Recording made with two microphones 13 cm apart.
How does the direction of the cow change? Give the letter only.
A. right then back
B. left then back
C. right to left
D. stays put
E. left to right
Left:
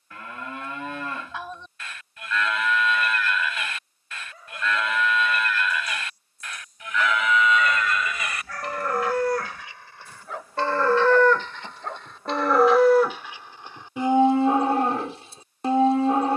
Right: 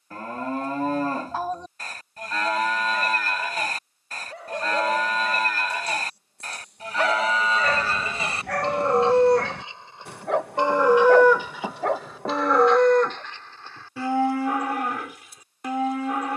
C.